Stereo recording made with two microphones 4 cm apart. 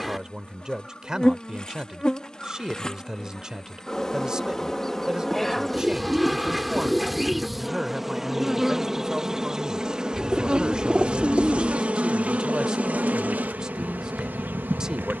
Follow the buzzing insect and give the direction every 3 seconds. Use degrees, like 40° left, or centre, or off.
20° left, 10° left, centre, 20° right, 40° right.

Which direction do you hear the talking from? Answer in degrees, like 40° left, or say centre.
20° right.